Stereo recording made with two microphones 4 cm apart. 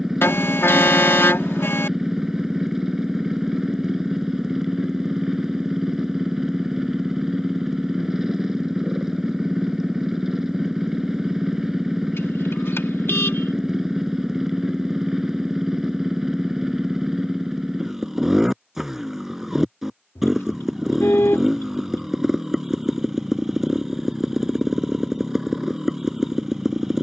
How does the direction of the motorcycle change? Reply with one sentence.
You can hear the motorcycle stay in one place.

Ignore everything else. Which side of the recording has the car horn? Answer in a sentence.
In this clip you hear the car horn on the left.